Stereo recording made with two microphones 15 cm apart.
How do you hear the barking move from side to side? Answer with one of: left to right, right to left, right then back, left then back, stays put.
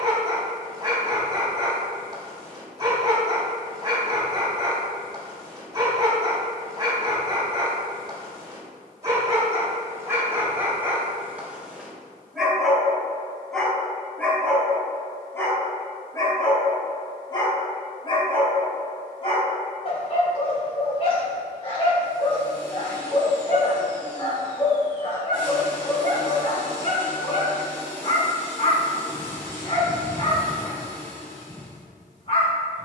right to left.